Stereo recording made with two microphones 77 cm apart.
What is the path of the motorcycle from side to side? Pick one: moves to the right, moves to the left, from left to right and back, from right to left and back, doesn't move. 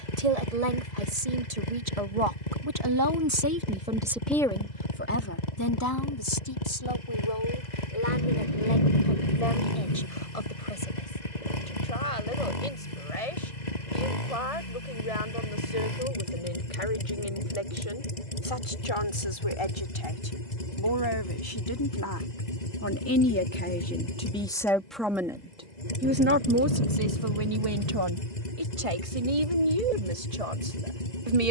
doesn't move.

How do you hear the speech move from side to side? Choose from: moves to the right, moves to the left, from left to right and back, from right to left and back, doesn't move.
from right to left and back.